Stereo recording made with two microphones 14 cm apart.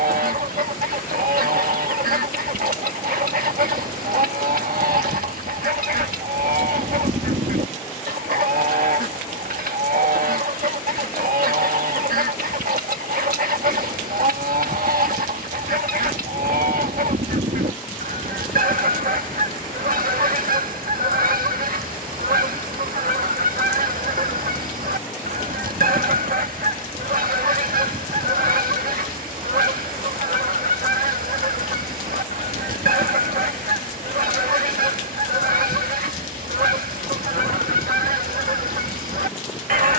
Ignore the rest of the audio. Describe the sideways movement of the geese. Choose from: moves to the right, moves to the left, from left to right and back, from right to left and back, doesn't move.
doesn't move.